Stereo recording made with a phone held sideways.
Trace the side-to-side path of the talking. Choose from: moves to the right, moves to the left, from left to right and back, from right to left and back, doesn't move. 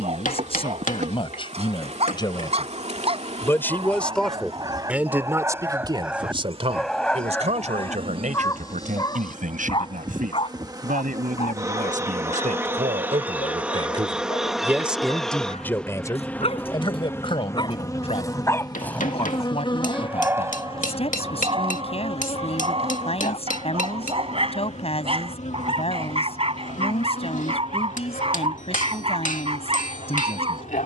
from left to right and back.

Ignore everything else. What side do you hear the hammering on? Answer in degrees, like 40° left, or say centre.
70° left.